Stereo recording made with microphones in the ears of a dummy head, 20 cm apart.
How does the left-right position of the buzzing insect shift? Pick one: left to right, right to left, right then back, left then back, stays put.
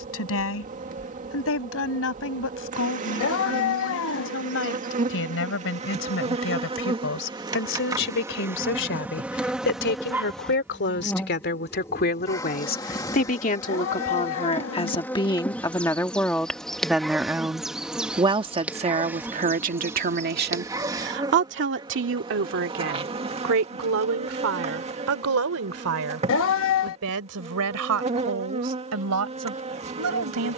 left then back.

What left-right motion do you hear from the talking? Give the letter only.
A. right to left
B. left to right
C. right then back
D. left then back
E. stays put
B.